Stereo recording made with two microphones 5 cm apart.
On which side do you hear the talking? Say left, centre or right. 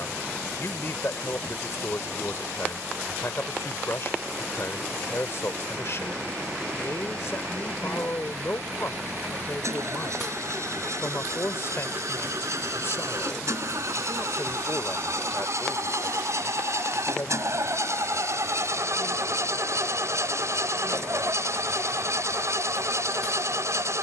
left.